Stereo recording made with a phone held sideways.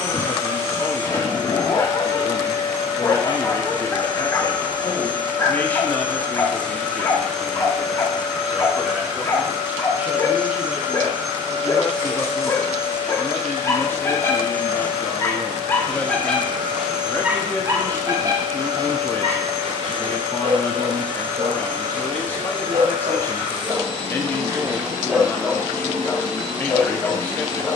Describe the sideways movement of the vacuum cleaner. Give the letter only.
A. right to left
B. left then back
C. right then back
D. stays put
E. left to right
E.